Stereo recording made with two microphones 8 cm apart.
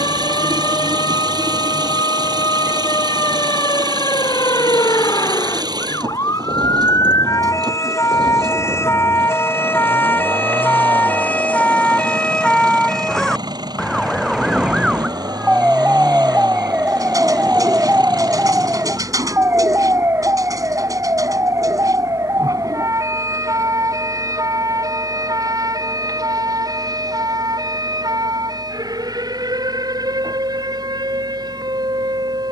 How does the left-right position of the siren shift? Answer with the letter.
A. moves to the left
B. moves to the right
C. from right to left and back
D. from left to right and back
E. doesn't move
B.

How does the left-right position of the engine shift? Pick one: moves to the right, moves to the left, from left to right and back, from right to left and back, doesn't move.
doesn't move.